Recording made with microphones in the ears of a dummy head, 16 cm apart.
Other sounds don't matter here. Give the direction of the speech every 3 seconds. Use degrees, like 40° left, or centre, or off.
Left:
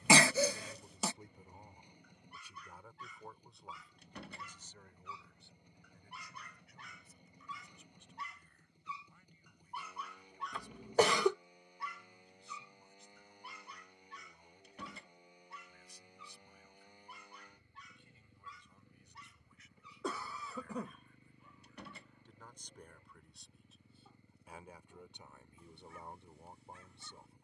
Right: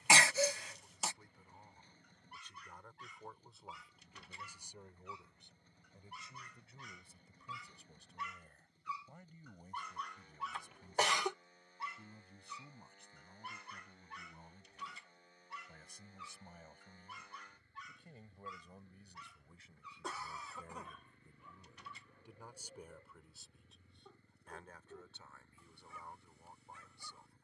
20° left, 10° right, 30° right, 40° right, 50° right, 40° right, 30° right, 10° right, 20° left.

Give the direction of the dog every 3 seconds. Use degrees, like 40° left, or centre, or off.
70° left, 60° left, 40° left, centre, 40° right, 60° right, 70° right, 70° right, 70° right.